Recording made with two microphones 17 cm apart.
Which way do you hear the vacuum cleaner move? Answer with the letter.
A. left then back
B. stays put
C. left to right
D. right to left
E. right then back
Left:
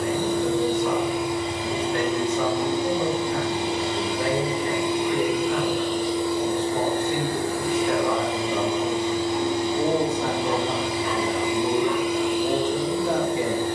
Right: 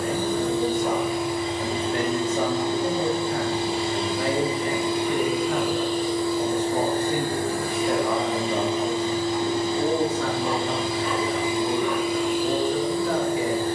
B.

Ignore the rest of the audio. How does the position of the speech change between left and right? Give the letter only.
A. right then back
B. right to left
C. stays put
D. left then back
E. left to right
B.